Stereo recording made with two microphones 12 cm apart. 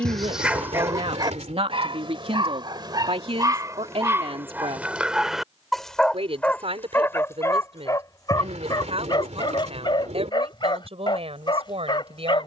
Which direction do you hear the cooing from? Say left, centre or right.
right.